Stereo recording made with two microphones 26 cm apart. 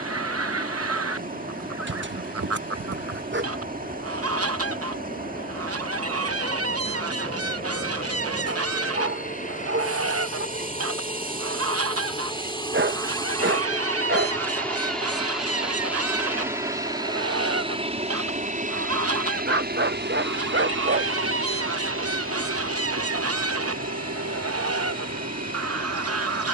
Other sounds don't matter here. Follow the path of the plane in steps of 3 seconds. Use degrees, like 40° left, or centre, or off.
50° left, 40° left, 40° left, 30° left, 10° left, 10° right, 30° right, 50° right, 60° right.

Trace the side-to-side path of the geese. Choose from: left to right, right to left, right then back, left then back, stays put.
stays put.